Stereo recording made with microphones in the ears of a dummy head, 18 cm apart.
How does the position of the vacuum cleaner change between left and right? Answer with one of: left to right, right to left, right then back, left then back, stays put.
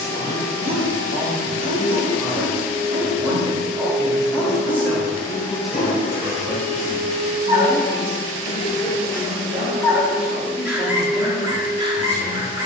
right to left.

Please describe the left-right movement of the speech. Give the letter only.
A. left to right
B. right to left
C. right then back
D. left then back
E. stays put
D.